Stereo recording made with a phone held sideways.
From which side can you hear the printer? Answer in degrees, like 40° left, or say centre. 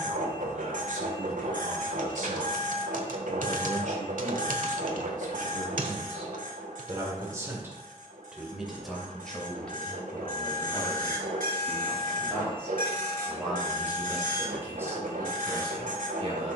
80° right.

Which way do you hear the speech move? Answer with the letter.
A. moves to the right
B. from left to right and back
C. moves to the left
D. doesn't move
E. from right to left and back
E.